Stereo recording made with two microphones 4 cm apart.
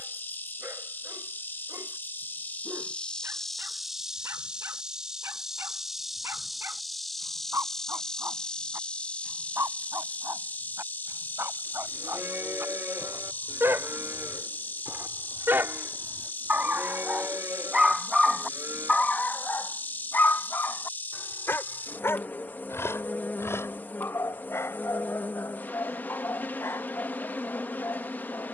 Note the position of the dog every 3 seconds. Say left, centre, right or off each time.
right, right, right, right, right, right, left, left, left, left.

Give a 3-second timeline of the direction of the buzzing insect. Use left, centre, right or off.
left, centre, centre, left, left, left, left, left, left, left.